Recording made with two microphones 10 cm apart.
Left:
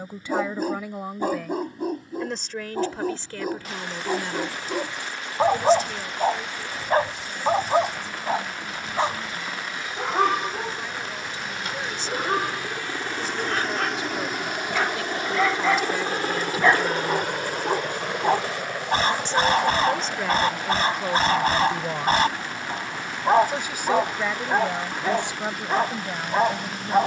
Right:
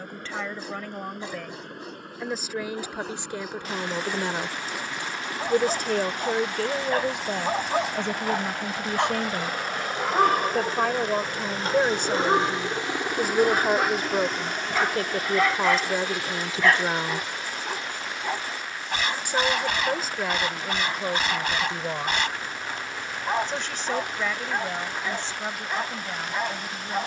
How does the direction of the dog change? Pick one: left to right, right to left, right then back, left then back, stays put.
right then back.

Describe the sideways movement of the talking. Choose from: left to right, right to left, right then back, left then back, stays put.
right then back.